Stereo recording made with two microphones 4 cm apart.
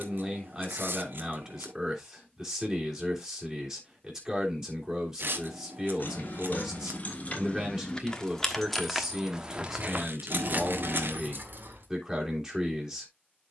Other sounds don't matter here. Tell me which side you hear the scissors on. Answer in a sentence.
In this clip you hear the scissors on the right.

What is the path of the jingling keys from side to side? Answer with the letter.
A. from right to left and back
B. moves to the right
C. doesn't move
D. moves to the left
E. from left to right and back
B.